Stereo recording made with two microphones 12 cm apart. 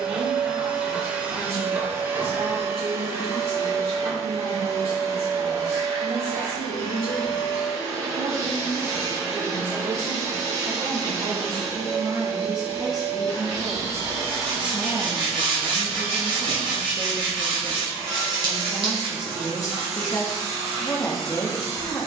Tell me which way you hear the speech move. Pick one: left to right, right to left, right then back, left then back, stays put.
right to left.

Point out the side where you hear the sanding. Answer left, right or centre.
right.